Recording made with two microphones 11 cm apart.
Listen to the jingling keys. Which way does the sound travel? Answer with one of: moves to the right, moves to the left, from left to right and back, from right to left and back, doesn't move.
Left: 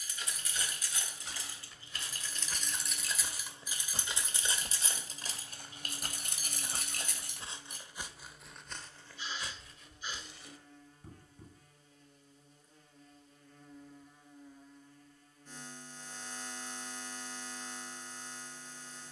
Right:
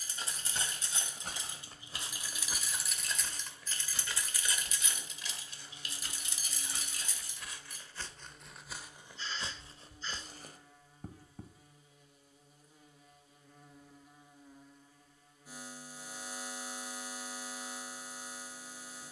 moves to the left.